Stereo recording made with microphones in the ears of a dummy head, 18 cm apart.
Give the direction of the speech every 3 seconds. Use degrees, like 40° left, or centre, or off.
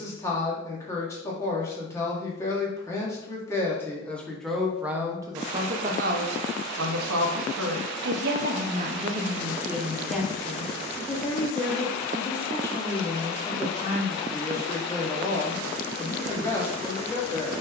20° left, centre, 60° right, centre, 10° left, 10° left.